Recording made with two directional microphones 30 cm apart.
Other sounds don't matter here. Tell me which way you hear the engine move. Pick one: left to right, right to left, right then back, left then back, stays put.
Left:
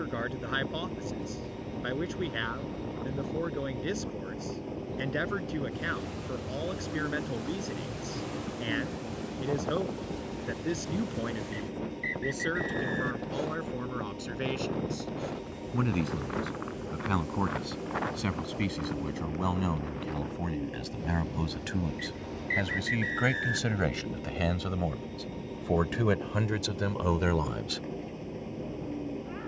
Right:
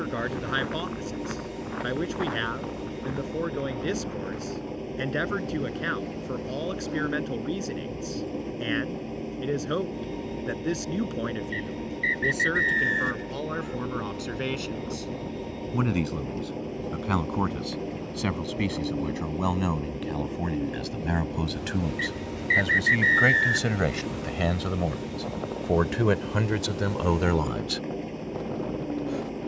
stays put.